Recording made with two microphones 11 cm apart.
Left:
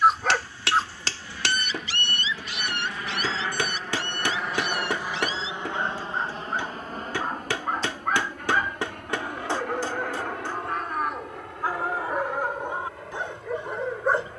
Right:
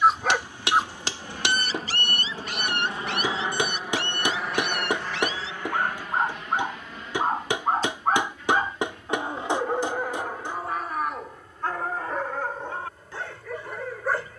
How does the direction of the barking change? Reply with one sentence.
In this clip you hear the barking move from left to right and back again.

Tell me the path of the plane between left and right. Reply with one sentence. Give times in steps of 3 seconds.
In this clip you hear the plane on the right from 0 s, in the centre from 3 s and on the left from 6 s.